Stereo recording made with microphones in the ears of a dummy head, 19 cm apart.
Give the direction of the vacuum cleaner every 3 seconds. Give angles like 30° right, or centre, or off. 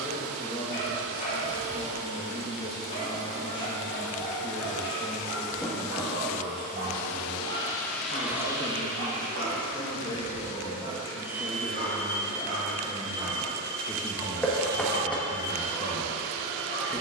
60° left, 60° left, 10° left, 30° right, 40° left, 60° left.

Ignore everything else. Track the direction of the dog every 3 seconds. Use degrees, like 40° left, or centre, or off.
30° left, 10° left, 60° right, 60° right, 10° right, 30° left.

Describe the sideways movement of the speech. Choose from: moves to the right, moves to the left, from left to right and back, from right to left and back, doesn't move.
doesn't move.